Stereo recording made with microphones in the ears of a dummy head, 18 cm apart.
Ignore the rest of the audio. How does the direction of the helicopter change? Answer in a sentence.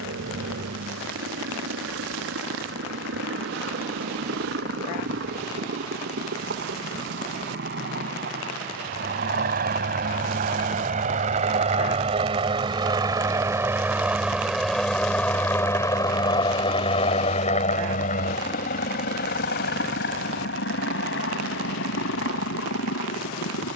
You can hear the helicopter move to the left.